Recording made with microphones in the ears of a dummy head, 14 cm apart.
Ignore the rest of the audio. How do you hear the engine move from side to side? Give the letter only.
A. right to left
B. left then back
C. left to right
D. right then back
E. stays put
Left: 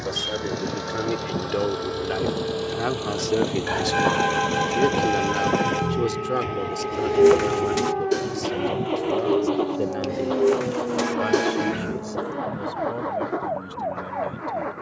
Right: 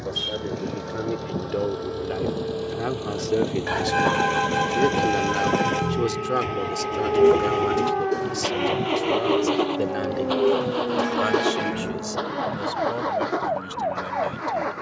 C.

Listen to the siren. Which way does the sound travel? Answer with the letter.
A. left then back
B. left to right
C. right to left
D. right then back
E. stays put
B.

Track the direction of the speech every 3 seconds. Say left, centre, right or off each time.
left, centre, right, right, right.